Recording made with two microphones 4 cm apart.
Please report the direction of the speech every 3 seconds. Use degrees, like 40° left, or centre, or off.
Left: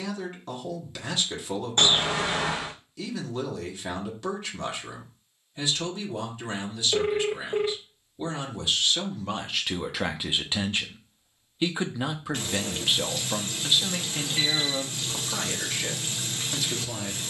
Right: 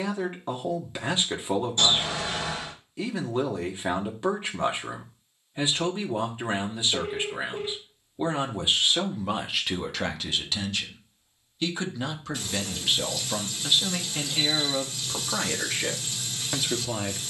30° right, 30° right, 30° right, 10° left, centre, 20° right.